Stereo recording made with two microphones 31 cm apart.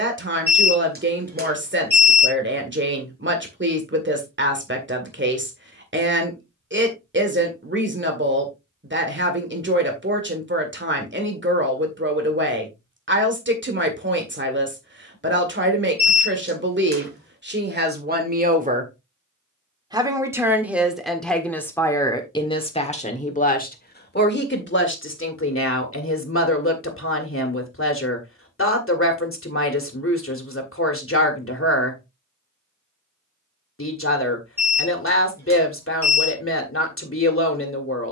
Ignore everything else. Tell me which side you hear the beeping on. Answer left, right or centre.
right.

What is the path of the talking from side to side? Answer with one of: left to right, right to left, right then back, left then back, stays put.
right to left.